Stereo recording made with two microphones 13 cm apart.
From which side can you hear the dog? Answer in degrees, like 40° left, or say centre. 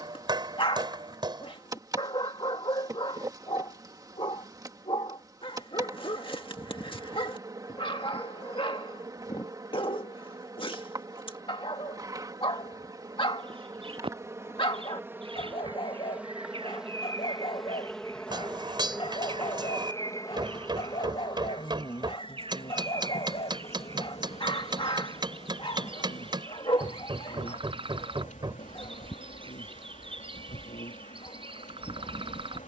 40° left.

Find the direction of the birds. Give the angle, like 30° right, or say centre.
40° right.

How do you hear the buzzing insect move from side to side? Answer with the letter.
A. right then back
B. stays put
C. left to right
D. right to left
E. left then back
D.